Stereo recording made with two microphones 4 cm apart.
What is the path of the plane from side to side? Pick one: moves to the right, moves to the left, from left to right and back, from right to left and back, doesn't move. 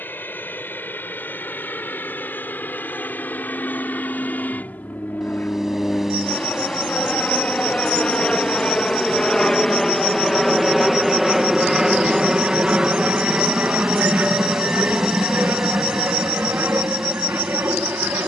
moves to the right.